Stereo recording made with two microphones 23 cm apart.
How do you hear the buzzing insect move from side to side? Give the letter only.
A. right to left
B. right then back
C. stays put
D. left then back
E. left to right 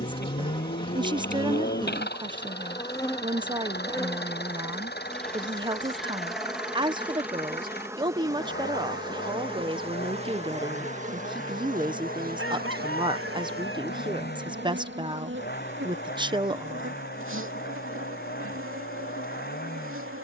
E.